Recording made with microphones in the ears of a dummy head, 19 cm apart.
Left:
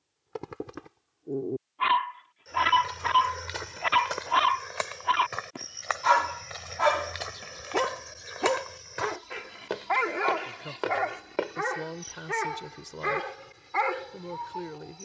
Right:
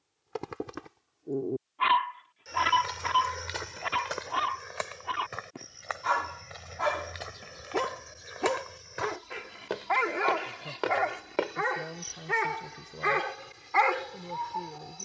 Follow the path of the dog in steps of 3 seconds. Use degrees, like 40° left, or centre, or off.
10° right, 40° left, 20° left, centre, 20° right.